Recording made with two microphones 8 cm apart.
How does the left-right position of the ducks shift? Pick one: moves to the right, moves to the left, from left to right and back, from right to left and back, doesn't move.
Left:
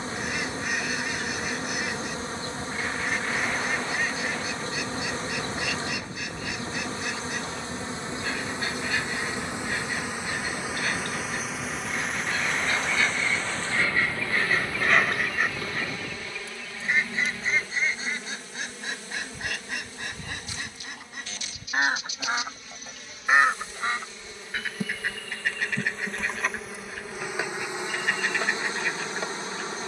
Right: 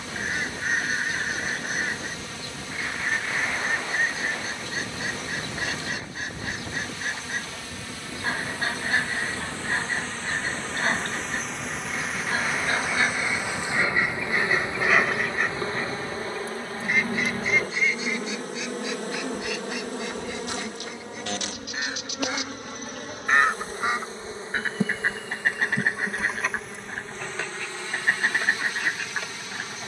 from right to left and back.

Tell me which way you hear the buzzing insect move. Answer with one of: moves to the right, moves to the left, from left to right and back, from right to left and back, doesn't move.
from left to right and back.